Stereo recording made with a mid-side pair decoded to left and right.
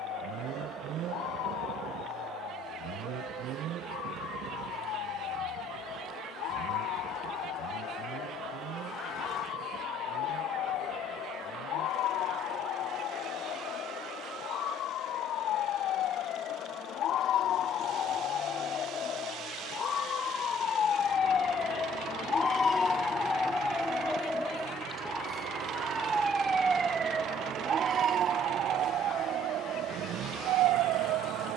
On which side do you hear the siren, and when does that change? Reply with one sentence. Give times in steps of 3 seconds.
You can hear the siren on the left from 0 s, in the centre from 24 s and on the right from 27 s.